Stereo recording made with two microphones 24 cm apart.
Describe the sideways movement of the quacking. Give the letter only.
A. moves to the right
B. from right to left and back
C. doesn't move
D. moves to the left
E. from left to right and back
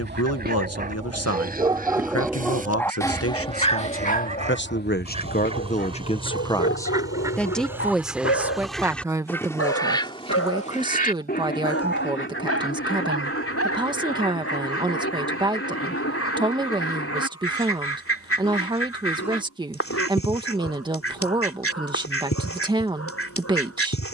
D.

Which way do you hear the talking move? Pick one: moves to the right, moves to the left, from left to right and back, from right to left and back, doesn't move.
moves to the right.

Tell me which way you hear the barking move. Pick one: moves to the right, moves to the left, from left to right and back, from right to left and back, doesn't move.
moves to the left.